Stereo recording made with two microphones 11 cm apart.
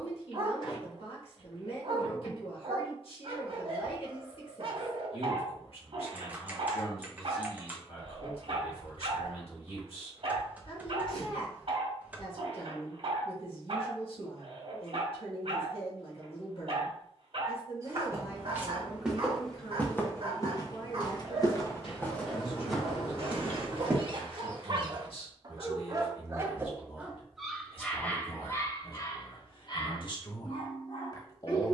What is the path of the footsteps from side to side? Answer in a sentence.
You can hear the footsteps go left and come back.